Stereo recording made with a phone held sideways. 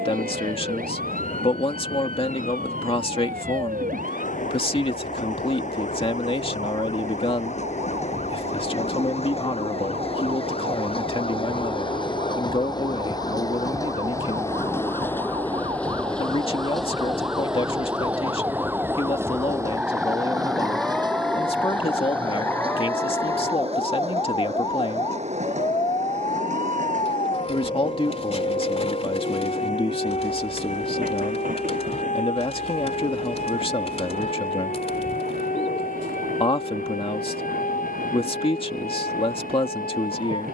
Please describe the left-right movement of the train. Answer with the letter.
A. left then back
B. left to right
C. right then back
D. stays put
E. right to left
B.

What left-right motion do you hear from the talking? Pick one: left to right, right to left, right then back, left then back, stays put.
stays put.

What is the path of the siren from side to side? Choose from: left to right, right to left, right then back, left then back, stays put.
right to left.